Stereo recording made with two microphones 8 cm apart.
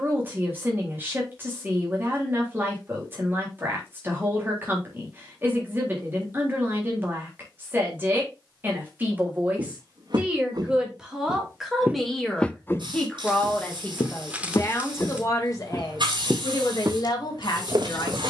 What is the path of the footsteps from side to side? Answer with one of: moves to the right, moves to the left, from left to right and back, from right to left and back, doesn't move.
from right to left and back.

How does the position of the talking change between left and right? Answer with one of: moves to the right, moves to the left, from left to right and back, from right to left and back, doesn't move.
moves to the left.